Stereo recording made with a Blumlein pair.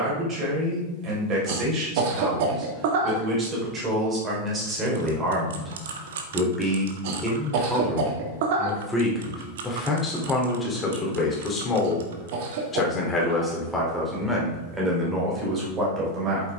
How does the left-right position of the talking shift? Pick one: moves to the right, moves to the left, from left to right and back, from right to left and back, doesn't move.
from right to left and back.